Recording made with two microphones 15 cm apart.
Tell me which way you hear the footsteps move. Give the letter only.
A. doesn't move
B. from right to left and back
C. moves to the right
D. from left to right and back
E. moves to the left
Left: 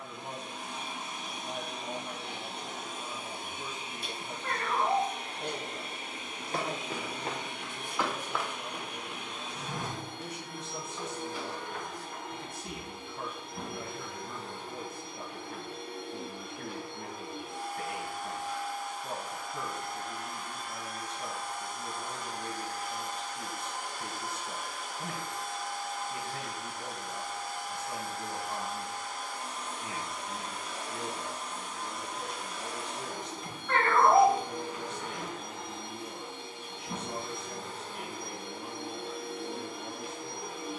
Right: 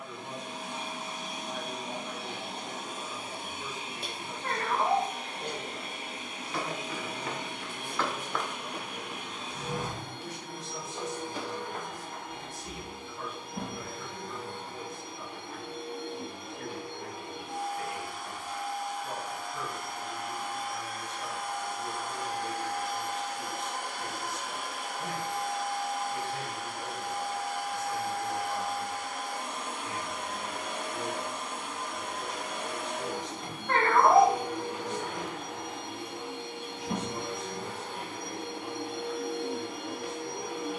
C.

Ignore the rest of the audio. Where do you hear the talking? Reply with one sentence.
In this clip you hear the talking on the left.